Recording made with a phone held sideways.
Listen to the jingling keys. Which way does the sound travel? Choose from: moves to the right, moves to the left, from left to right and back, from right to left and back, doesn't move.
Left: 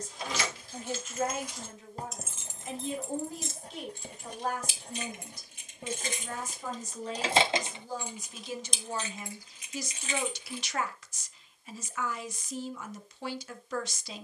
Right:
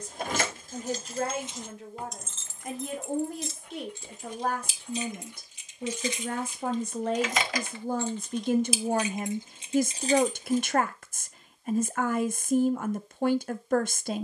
from right to left and back.